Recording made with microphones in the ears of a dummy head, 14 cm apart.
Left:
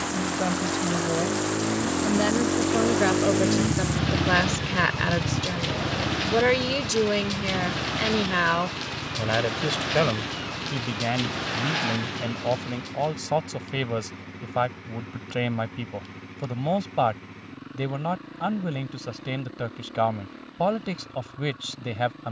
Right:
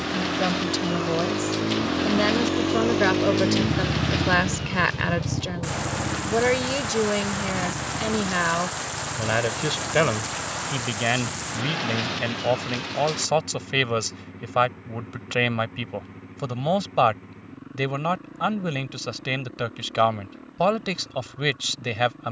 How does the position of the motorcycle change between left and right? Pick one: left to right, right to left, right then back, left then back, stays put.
right to left.